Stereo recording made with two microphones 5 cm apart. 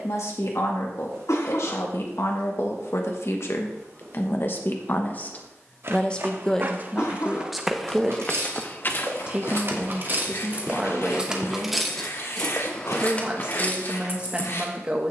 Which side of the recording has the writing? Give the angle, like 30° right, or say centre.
70° left.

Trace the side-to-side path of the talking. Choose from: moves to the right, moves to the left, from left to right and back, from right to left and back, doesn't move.
moves to the right.